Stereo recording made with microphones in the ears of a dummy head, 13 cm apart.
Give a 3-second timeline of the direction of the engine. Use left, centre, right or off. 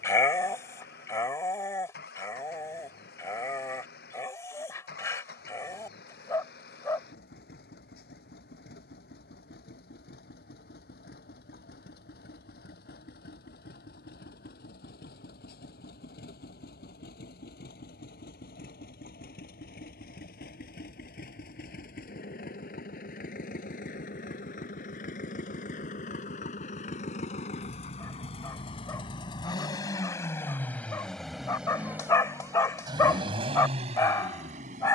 left, left, left, left, left, left, left, left, left, left, centre, right.